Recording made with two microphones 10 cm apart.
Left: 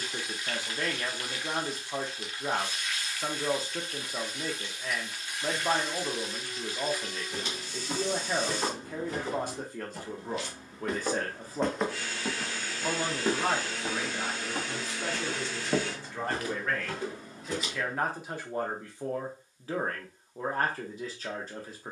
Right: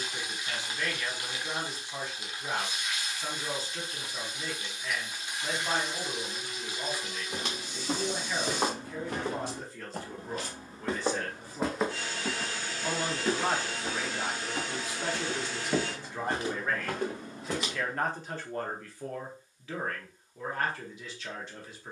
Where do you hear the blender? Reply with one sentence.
You can hear the blender on the right.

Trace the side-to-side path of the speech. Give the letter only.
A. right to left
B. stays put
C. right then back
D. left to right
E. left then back
C.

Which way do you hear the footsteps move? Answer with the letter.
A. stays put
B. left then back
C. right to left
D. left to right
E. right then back
B.